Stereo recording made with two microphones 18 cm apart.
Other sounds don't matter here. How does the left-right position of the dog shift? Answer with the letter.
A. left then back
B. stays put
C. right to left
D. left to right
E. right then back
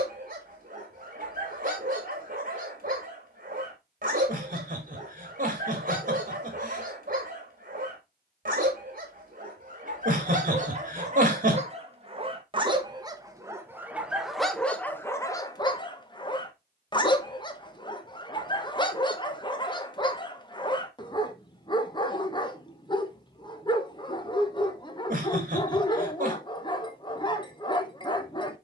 C.